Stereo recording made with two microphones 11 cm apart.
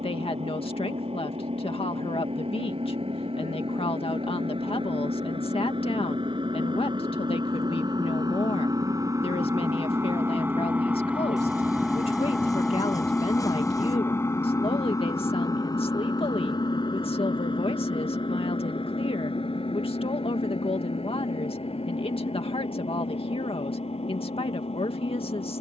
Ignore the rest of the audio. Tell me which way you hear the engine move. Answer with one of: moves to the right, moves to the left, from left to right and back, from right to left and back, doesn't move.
moves to the left.